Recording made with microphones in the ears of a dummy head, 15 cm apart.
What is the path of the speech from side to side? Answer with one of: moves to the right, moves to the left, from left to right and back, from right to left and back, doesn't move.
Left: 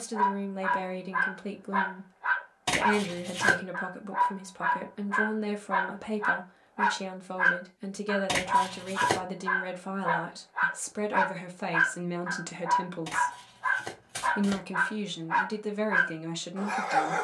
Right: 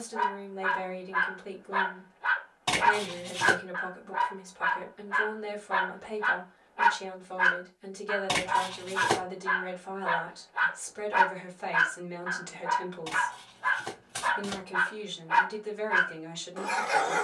doesn't move.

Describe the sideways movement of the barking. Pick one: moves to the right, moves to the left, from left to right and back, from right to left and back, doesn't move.
doesn't move.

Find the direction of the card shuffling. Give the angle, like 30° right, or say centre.
20° left.